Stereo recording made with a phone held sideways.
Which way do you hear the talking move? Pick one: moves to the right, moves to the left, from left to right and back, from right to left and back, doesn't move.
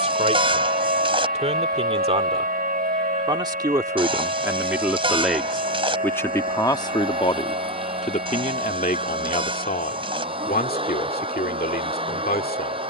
moves to the left.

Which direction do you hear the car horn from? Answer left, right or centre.
right.